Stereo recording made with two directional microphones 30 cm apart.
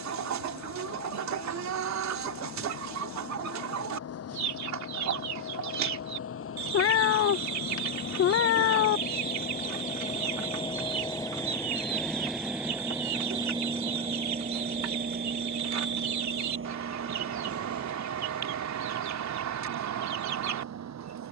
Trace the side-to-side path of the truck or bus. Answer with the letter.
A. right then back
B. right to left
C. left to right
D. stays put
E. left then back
C.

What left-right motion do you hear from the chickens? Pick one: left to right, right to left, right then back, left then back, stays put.
stays put.